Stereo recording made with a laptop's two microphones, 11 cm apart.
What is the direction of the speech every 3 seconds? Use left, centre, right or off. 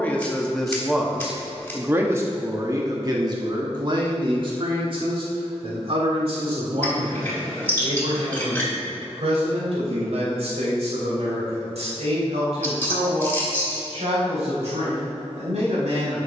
centre, right, right, right, right, right.